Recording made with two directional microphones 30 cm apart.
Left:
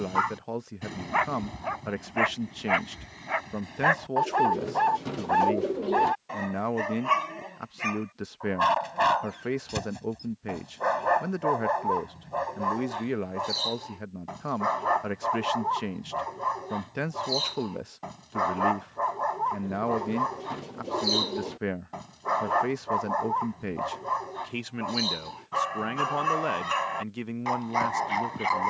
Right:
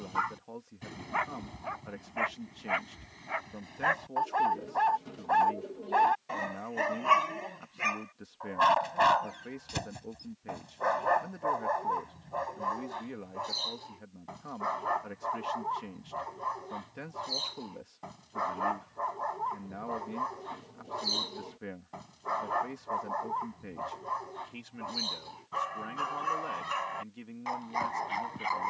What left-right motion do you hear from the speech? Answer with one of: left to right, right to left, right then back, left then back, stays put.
stays put.